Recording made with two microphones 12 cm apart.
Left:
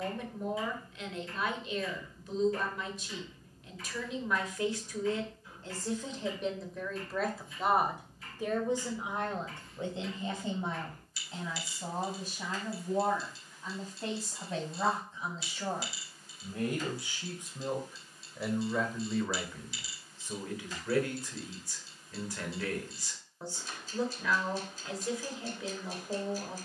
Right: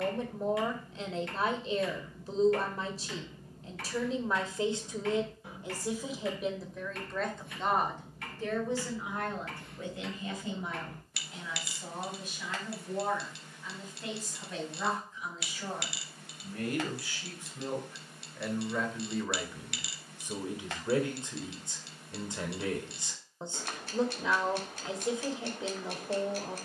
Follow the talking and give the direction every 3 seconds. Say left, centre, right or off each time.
right, right, centre, left, left, left, centre, right, right.